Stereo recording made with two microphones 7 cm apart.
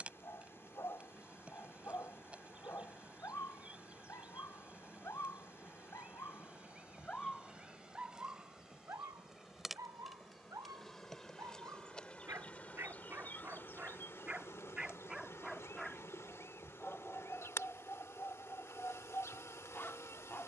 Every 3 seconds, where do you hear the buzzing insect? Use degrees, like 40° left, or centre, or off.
20° right, 20° right, 10° right, centre, 30° left, 40° left, 40° left.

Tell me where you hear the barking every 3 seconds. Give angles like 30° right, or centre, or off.
40° left, 40° left, centre, 50° right, 30° right, 10° left, 30° left.